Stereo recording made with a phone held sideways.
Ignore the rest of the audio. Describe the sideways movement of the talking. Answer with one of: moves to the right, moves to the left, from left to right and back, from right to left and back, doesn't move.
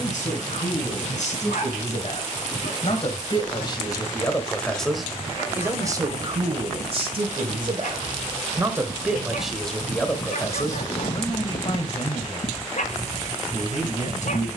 from left to right and back.